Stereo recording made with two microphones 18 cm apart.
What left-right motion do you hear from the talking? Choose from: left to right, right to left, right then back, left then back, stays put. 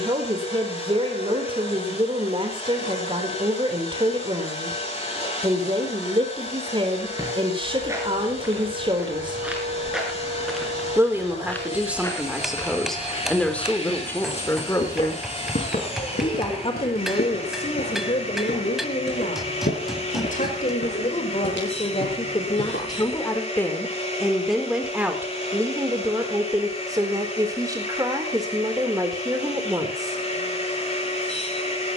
left then back.